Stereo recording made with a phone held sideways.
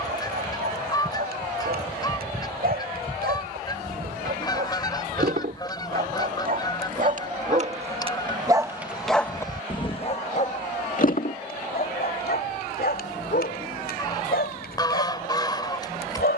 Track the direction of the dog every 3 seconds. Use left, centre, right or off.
right, right, right, left, left, left.